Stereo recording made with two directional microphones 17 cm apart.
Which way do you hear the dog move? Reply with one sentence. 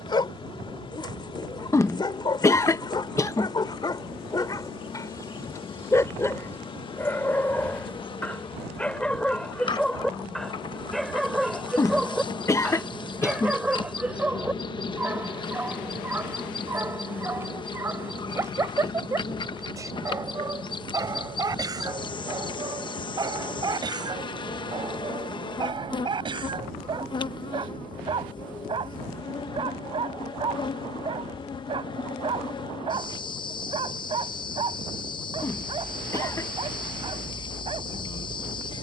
You can hear the dog move from left to right.